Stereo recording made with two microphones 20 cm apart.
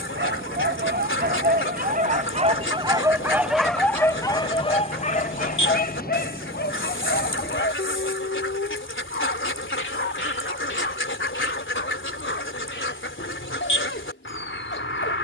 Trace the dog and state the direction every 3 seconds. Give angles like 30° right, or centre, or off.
50° right, 20° left, 60° left, 70° left, 80° left.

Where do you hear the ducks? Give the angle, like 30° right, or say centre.
80° left.